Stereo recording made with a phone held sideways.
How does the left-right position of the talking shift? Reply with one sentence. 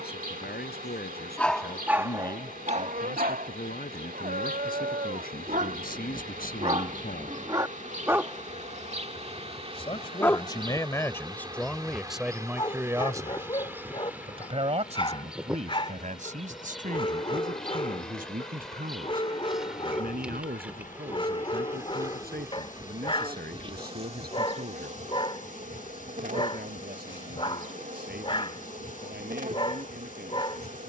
In this clip you hear the talking move from left to right.